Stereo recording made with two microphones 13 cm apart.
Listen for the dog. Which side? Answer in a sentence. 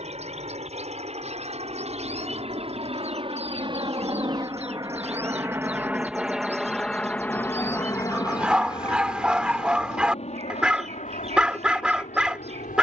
In this clip you hear the dog in the centre.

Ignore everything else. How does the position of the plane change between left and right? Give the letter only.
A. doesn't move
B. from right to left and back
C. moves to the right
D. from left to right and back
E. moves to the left
E.